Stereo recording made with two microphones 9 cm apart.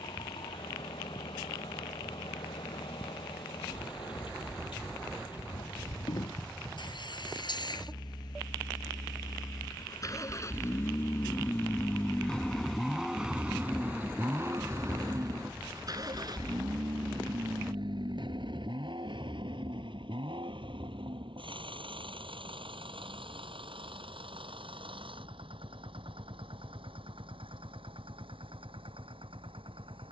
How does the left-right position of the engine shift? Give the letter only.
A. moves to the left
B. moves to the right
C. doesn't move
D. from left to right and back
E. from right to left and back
B.